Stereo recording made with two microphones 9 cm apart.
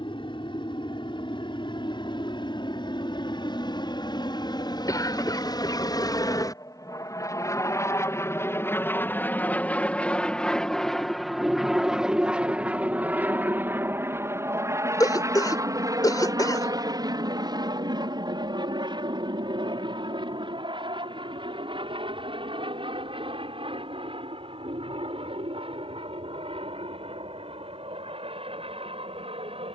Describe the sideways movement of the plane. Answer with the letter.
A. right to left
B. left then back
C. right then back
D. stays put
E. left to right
E.